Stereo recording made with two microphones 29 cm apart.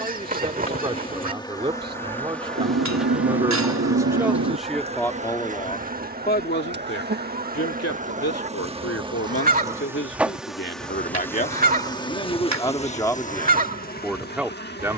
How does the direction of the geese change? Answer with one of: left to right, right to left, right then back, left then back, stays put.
stays put.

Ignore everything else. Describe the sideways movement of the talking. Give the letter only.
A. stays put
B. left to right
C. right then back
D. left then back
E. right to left
D.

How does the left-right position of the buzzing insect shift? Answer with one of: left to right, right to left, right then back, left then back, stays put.
right then back.